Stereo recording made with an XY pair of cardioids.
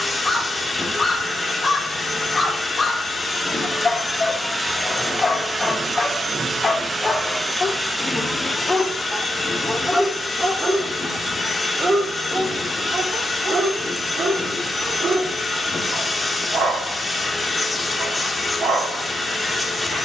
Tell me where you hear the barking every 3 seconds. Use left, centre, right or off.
left, left, left, centre, right, right, right.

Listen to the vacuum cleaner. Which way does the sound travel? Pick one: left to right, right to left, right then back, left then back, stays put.
right then back.